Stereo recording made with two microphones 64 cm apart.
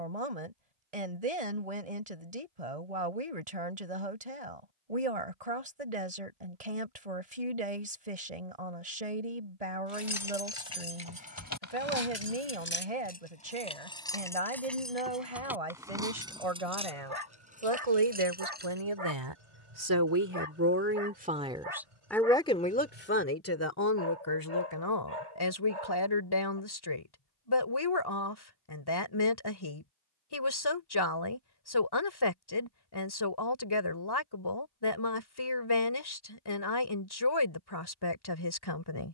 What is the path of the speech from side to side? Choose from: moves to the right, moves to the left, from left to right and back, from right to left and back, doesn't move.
moves to the left.